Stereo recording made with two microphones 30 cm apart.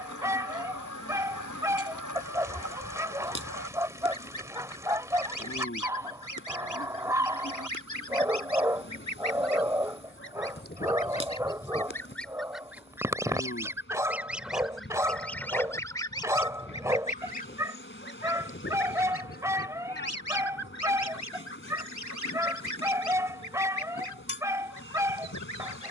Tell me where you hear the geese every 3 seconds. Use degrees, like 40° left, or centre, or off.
80° left, 80° left, 70° left, 40° left, centre, 20° left, 50° left, 70° left, 70° left.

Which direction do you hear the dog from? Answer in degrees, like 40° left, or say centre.
10° right.